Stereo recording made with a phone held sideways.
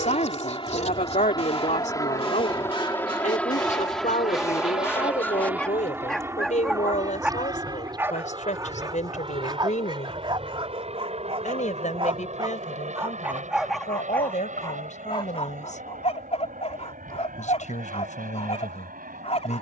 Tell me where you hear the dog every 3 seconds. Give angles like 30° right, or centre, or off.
40° left, 20° left, 10° right, 30° right, 10° right, 40° left, 40° left.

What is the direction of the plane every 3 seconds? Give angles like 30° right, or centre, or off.
30° left, centre, 20° right, 40° right, 50° right, 50° right, 60° right.